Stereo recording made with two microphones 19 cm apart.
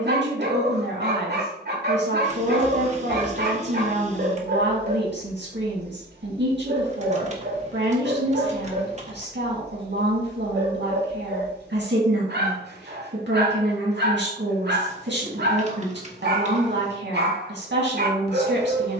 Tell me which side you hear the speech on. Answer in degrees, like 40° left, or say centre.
70° right.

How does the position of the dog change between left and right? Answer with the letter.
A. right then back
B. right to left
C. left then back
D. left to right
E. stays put
E.